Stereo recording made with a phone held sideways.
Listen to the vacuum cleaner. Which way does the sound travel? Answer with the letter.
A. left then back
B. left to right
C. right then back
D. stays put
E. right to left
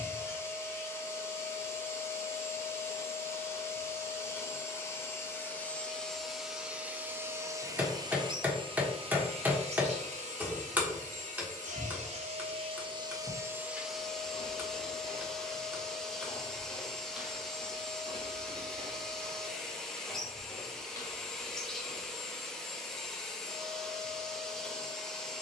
C.